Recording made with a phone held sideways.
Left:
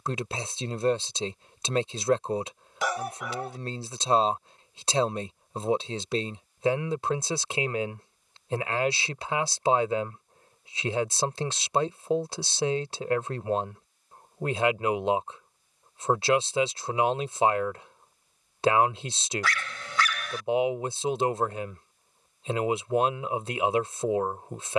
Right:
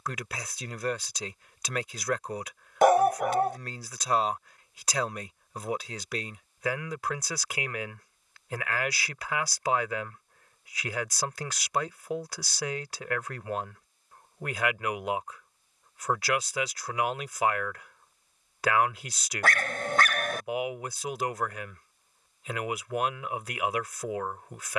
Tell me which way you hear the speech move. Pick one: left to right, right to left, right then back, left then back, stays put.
stays put.